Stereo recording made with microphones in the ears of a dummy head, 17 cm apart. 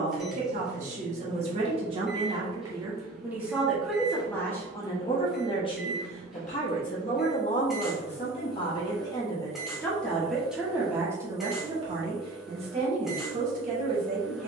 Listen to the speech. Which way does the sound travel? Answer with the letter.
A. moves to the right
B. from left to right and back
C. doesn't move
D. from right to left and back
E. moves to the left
D.